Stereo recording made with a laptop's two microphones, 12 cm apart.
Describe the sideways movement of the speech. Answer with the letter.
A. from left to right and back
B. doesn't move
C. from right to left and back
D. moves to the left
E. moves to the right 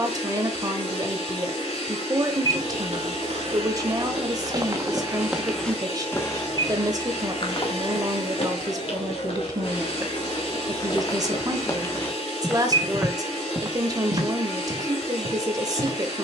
B.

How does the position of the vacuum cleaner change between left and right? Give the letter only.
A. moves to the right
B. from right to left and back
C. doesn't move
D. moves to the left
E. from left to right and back
C.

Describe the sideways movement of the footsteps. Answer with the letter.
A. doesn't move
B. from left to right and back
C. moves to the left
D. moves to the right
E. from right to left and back
E.